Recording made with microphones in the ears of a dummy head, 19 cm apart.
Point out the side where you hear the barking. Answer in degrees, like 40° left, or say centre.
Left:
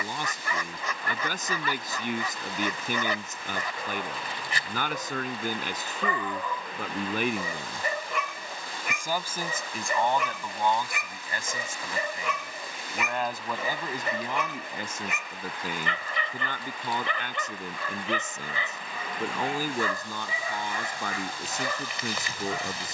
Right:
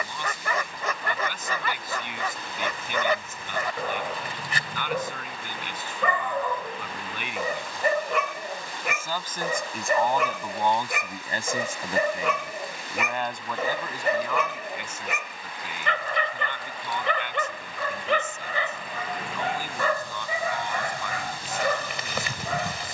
50° right.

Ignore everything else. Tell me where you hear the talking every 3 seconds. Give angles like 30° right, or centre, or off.
40° left, 40° left, 30° left, 10° right, 10° left, 40° left, 40° left, 40° left.